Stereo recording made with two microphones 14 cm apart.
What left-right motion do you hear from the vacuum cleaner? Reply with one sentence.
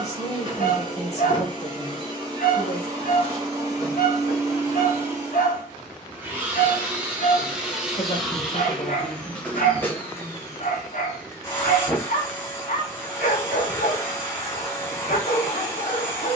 In this clip you hear the vacuum cleaner travel towards the left.